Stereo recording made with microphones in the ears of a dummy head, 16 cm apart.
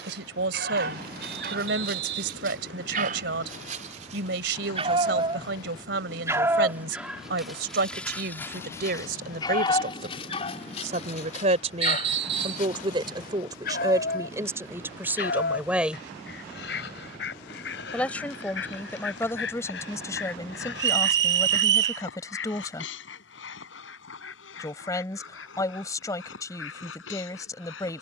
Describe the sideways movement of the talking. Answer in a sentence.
You can hear the talking go from the right side to the left.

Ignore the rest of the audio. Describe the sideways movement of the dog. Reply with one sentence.
In this clip you hear the dog travel towards the left.